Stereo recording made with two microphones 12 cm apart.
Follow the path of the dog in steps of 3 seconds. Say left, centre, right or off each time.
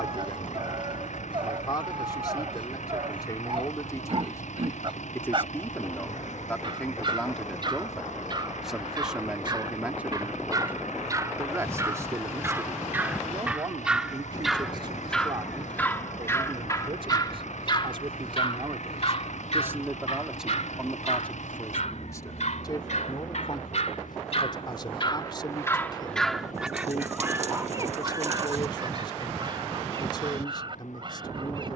right, right, right, right, centre, left, left, left, left, right, right.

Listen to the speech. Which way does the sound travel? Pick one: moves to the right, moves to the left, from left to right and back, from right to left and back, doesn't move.
from left to right and back.